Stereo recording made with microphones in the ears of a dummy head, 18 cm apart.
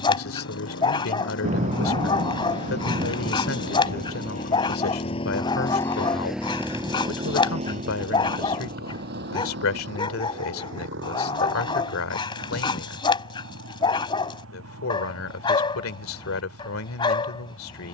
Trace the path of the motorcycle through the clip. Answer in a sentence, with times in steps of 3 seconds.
You can hear the motorcycle on the left from 0 s and on the right from 6 s.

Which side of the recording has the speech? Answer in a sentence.
In this clip you hear the speech on the left.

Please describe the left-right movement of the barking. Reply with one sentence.
You can hear the barking stay in one place.